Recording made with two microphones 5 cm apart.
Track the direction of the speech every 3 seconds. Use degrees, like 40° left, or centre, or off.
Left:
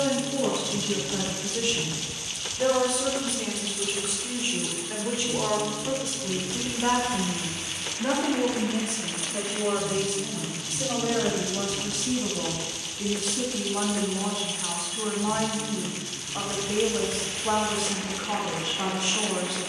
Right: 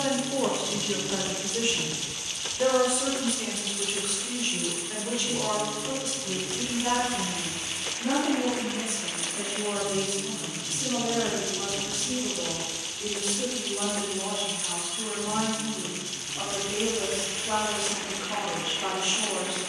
20° right, 10° left, 40° left, 50° left, 60° left, 70° left, 70° left.